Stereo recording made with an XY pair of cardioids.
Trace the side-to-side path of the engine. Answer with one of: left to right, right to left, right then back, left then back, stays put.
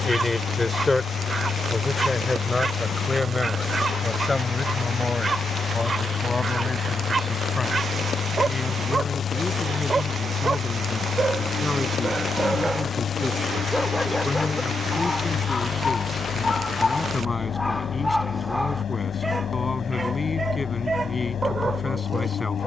stays put.